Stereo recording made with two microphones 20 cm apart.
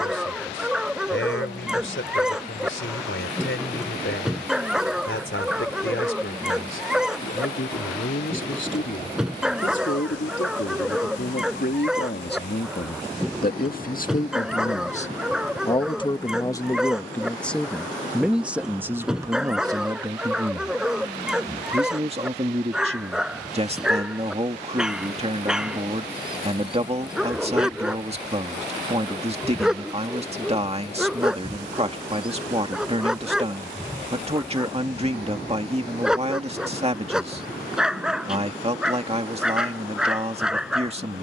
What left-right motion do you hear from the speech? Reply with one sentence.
In this clip you hear the speech travel towards the right.